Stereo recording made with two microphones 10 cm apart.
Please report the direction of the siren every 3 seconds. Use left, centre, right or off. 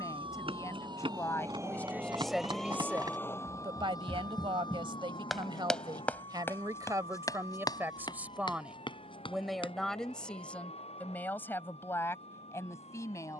right, left, left, left, left.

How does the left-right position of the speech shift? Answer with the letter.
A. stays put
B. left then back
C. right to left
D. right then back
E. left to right
D.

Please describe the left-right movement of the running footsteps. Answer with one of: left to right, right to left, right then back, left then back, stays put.
right to left.